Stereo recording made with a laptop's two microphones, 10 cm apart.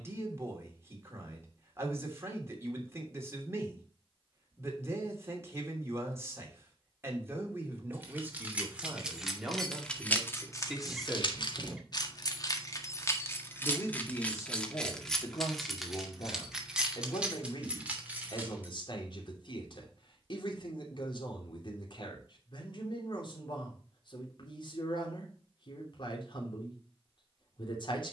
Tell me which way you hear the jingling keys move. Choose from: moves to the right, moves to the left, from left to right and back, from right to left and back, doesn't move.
from right to left and back.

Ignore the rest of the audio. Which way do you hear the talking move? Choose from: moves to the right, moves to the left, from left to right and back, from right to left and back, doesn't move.
moves to the left.